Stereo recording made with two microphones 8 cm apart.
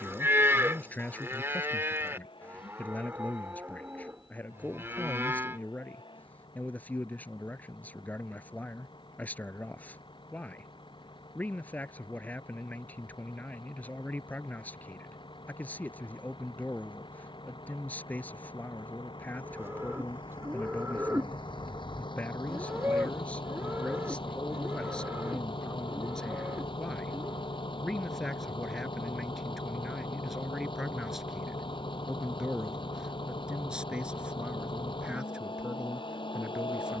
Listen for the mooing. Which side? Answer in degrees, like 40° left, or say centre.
30° right.